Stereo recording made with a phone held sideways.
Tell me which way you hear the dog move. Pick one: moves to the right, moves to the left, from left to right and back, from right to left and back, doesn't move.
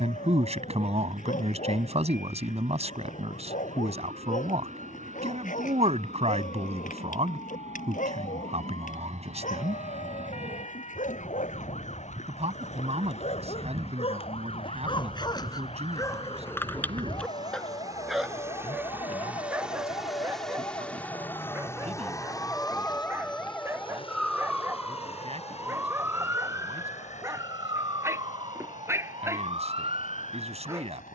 moves to the right.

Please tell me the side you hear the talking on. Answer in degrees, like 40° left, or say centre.
50° right.